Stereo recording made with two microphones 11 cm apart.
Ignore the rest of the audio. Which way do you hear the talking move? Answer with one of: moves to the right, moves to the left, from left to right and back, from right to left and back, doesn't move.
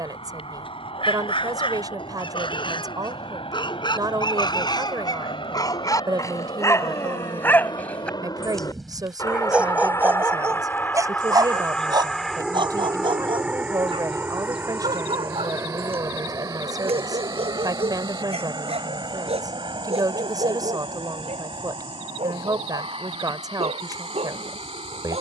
doesn't move.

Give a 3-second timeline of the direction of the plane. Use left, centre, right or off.
left, left, left, left, centre, right, right, right, right.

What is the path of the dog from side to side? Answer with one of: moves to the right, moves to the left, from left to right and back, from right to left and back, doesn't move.
moves to the right.